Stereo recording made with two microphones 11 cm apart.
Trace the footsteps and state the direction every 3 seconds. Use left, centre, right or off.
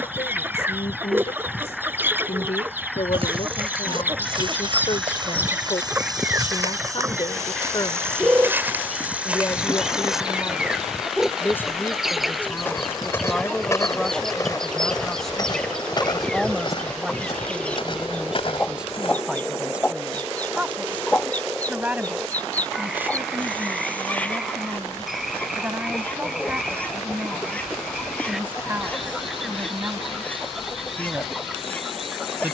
off, right, right, centre, left, left, left, off, off, off, off.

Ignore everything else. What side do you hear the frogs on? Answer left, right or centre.
centre.